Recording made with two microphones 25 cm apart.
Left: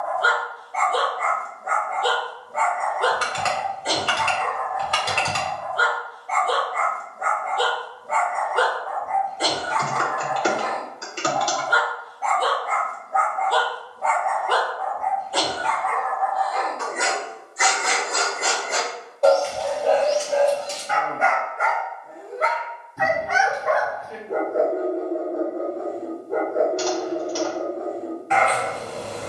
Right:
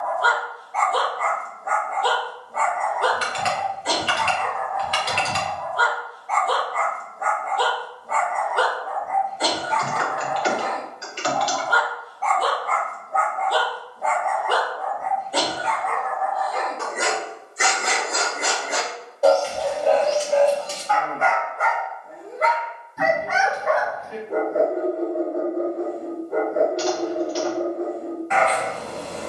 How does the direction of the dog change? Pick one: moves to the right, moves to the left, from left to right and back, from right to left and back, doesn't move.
from left to right and back.